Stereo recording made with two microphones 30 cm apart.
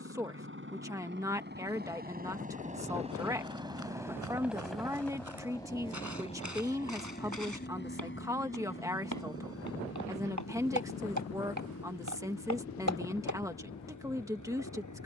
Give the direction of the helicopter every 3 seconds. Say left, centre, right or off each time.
right, centre, left, left, left.